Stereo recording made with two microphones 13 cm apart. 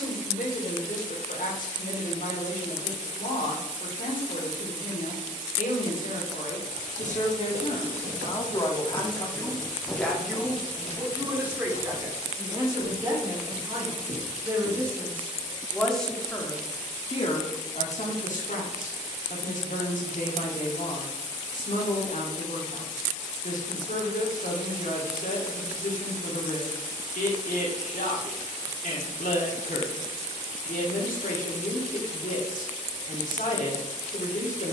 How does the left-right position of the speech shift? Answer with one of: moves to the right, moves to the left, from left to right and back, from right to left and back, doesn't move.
from left to right and back.